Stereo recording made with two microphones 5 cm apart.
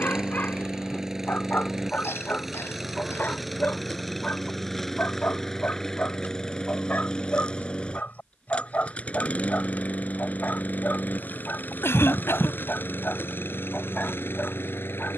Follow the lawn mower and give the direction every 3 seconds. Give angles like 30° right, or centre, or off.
10° right, centre, 20° left, 30° left, 40° left.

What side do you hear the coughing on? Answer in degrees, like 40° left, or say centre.
60° left.